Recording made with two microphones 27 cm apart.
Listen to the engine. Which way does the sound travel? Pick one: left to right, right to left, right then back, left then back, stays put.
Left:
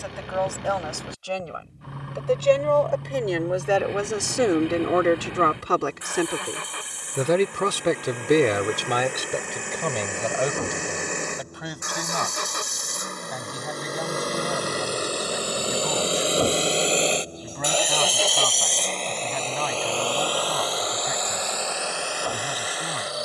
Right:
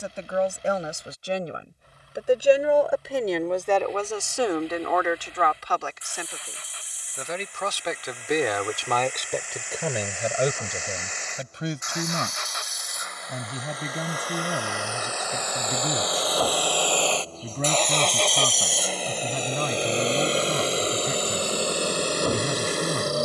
left to right.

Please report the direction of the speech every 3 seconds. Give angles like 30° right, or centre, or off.
20° right, 30° left, 50° left, 10° right, 30° right, 30° right, 30° right, 30° right.